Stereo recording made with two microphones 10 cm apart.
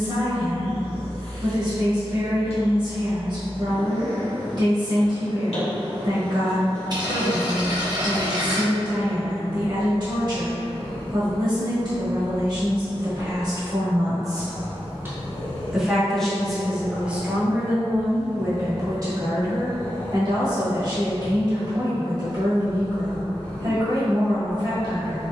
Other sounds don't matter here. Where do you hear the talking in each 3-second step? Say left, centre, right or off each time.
right, right, right, right, right, centre, right, right, right.